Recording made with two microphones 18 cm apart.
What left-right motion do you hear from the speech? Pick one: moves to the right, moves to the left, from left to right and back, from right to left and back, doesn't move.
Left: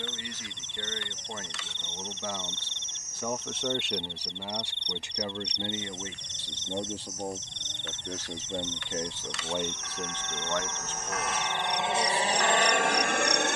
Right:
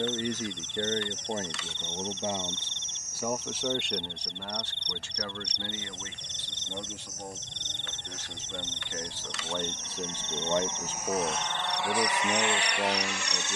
from right to left and back.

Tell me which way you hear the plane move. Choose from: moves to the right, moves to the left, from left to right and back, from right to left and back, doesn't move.
moves to the left.